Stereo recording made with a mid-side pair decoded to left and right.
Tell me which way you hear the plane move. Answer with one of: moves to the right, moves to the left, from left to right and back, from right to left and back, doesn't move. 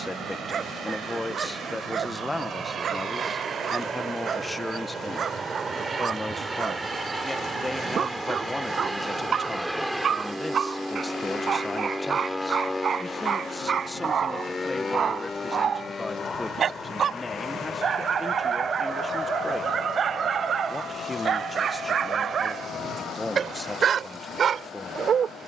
moves to the left.